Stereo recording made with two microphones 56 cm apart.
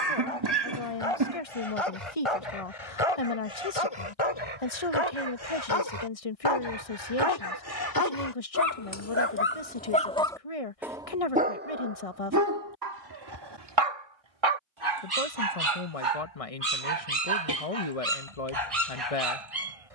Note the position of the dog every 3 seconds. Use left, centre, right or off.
left, left, left, centre, right, right, right.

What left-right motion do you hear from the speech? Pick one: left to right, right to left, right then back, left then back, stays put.
stays put.